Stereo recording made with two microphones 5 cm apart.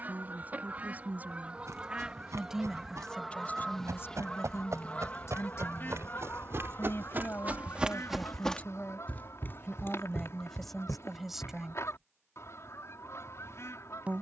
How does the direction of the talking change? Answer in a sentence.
In this clip you hear the talking move from right to left and back again.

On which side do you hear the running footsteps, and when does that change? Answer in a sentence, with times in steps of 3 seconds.
In this clip you hear the running footsteps on the right from 0 s, on the left from 9 s and not at all from 12 s.